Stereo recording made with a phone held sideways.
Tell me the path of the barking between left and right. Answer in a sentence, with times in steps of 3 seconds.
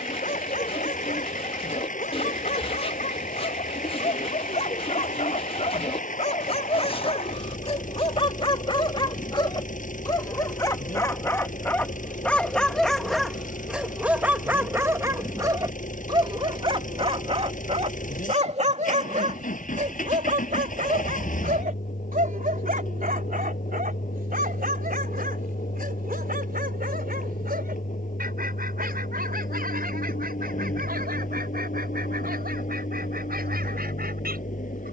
In this clip you hear the barking on the left from 0 s, in the centre from 12 s and on the right from 15 s.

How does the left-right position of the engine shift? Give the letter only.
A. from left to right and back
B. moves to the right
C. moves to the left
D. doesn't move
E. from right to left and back
D.